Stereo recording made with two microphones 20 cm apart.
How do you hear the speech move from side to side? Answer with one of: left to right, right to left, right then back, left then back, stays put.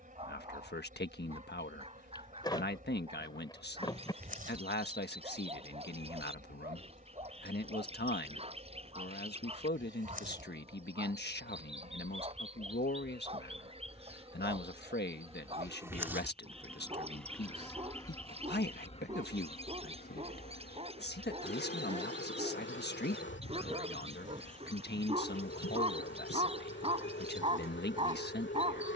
stays put.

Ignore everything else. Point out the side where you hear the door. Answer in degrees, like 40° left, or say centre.
20° left.